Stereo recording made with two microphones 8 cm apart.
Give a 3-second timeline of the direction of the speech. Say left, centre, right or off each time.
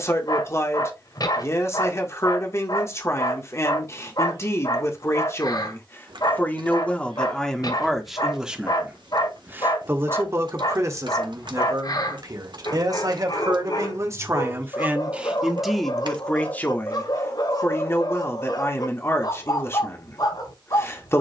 left, left, centre, right, right, centre, left.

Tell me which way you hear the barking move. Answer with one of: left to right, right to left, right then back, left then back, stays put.
stays put.